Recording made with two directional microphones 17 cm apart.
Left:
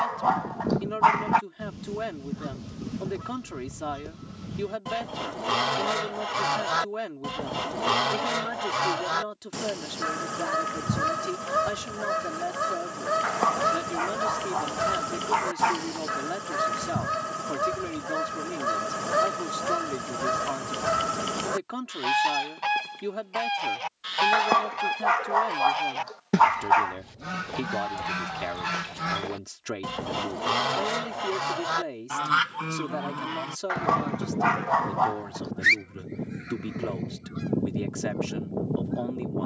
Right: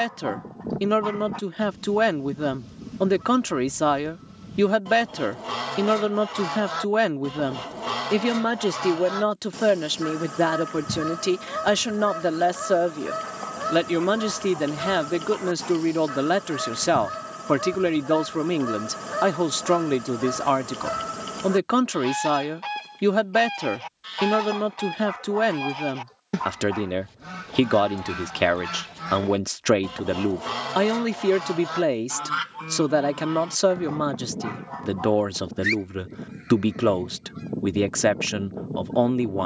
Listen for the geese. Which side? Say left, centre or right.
left.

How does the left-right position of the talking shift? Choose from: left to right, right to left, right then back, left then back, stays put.
stays put.